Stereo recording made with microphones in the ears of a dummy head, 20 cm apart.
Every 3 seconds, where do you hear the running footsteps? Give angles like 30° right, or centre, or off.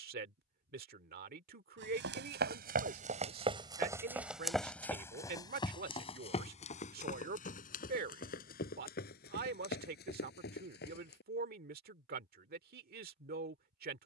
50° right, centre, 40° left, 50° left, off.